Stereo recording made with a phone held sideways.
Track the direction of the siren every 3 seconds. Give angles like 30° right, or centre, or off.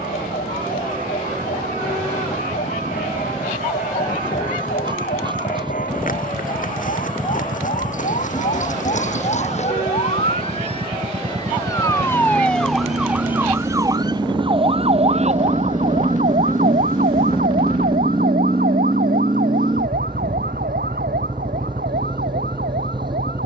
70° left, 70° left, 60° left, 40° left, 10° right, 50° right, 70° right, 80° right.